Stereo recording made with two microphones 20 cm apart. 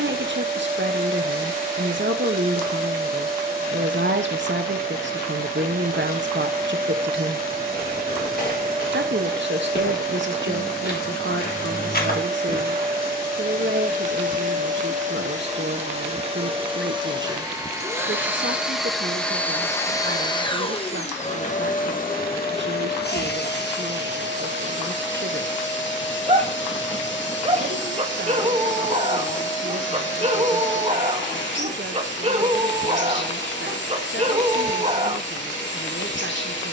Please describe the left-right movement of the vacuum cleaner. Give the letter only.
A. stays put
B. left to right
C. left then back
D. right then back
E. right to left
E.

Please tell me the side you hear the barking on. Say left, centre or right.
right.